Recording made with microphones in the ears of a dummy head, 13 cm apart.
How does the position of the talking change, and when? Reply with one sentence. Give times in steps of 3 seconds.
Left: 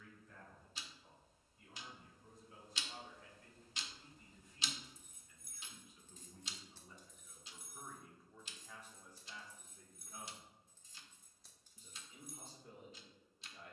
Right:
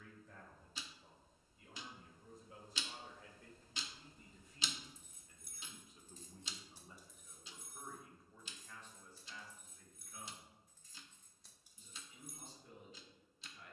In this clip you hear the talking on the right from 0 s, in the centre from 6 s and on the left from 9 s.